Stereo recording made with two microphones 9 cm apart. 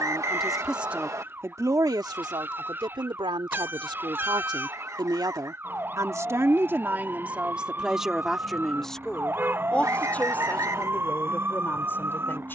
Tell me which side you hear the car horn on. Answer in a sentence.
In this clip you hear the car horn on the right.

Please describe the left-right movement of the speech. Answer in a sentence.
You can hear the speech go right and come back.